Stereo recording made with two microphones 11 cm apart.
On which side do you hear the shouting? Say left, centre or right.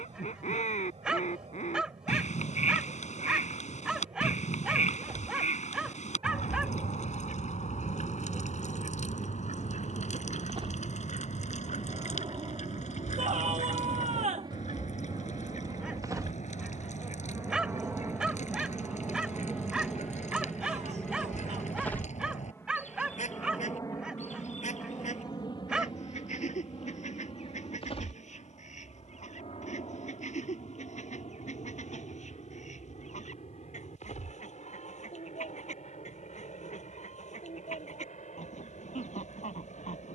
right.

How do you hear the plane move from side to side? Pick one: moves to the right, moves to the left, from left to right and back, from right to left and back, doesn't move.
moves to the left.